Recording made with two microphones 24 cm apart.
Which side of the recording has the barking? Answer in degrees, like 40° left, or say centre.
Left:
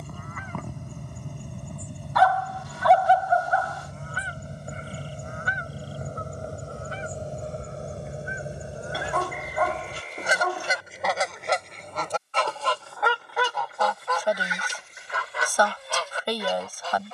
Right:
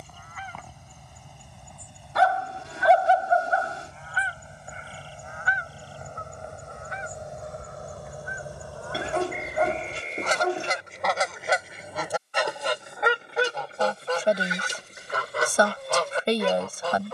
30° right.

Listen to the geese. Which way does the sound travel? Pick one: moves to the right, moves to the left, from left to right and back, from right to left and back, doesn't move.
moves to the right.